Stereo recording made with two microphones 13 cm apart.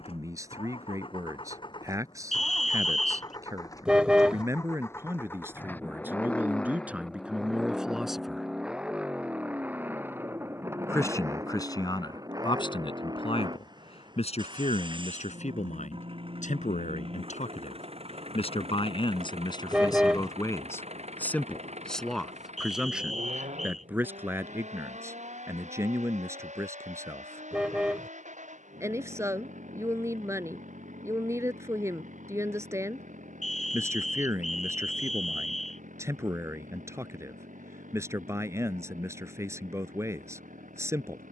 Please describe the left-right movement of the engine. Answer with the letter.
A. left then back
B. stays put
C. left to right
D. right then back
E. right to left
C.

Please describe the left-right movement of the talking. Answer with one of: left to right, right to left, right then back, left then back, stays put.
left then back.